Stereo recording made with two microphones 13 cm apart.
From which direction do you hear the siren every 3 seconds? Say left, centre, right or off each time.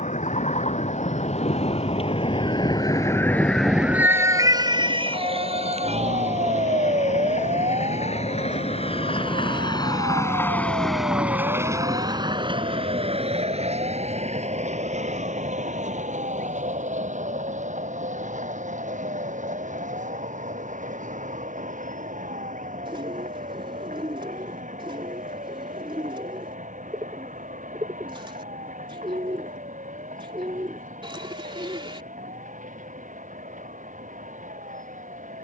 left, right, right, right, right, right, right, right, right, right, right, right.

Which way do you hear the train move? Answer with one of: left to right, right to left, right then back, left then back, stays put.
left to right.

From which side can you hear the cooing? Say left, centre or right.
right.